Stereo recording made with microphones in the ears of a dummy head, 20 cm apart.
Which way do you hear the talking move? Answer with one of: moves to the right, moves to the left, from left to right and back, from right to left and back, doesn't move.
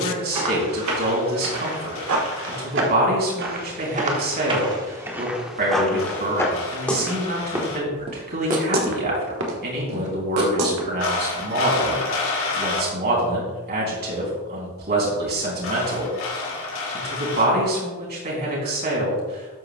doesn't move.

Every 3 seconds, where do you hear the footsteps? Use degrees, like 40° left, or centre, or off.
70° right, 20° right, 10° right, 70° right, off, off, off.